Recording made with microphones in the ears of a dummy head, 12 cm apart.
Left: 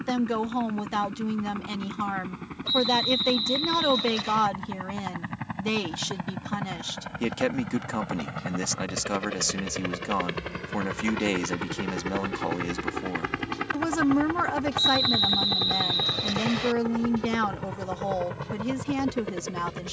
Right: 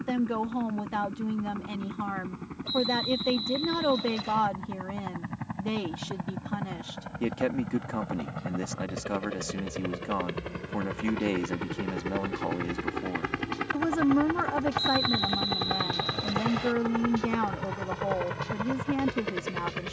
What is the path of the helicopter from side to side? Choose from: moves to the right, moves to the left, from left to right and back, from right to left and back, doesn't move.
moves to the right.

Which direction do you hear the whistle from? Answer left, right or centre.
left.